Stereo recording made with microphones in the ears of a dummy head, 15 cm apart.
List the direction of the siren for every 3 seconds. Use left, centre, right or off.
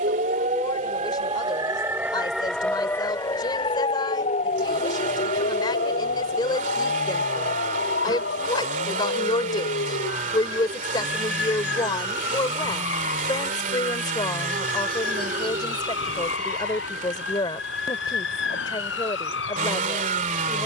right, left, left, left, left, left, left.